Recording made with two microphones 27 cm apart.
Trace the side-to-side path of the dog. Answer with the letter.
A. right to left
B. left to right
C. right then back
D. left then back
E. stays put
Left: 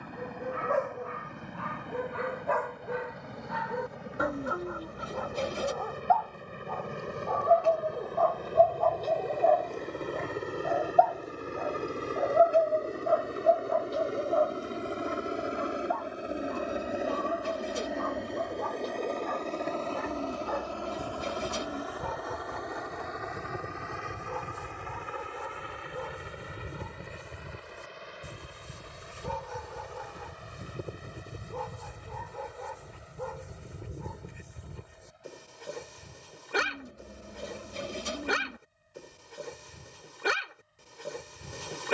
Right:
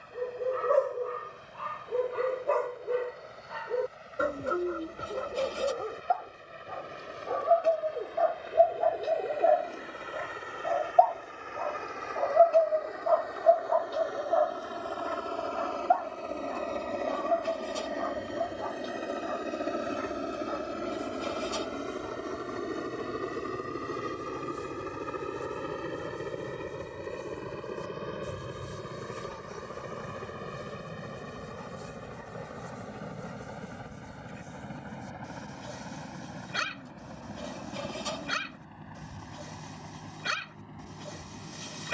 A.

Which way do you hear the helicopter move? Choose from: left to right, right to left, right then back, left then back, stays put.
left to right.